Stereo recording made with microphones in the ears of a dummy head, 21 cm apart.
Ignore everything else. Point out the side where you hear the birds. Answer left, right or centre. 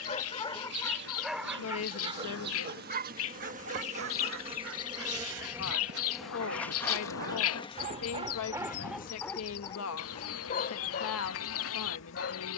left.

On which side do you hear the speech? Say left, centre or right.
left.